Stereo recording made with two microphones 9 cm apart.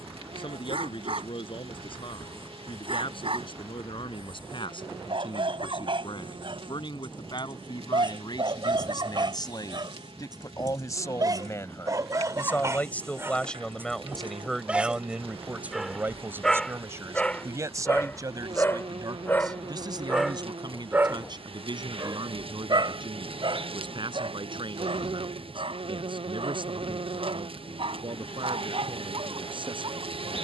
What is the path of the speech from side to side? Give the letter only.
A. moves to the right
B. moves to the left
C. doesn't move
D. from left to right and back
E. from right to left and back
A.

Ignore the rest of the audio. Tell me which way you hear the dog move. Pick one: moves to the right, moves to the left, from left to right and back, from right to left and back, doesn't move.
from right to left and back.